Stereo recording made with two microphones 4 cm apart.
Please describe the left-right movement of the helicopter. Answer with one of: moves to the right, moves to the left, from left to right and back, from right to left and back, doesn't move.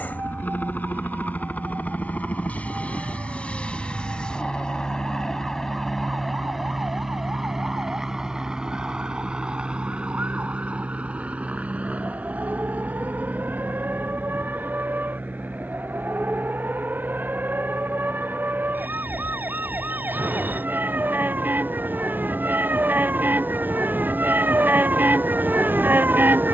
moves to the right.